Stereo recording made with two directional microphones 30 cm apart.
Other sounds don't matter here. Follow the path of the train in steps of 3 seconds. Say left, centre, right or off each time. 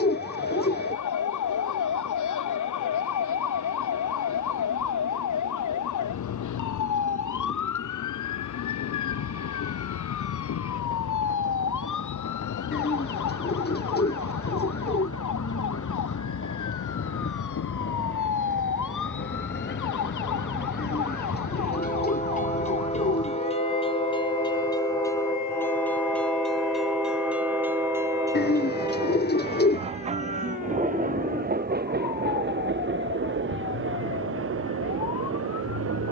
left, left, left, left, left, left, left, left, centre, centre, right, right.